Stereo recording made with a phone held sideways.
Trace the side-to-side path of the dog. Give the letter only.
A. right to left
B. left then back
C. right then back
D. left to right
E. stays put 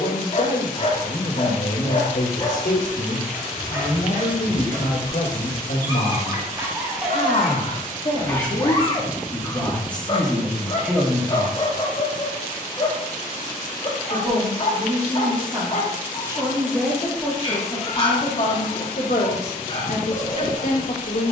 C.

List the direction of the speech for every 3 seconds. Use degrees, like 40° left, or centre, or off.
50° left, 50° left, 40° left, centre, 50° right, 10° right, 50° left.